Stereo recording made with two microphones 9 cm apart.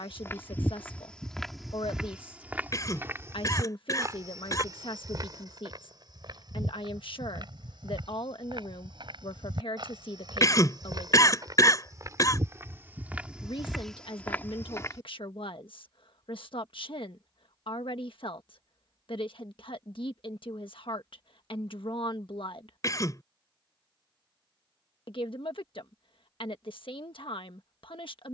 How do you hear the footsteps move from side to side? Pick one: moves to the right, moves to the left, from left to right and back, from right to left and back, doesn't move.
from left to right and back.